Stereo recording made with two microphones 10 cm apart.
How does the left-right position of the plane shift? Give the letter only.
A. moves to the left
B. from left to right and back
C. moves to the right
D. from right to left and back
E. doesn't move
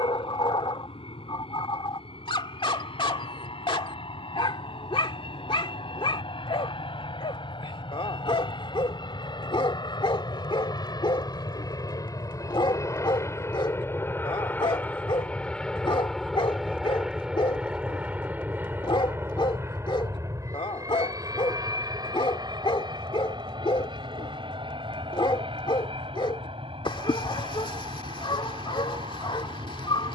C.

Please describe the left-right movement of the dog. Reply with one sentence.
You can hear the dog stay in one place.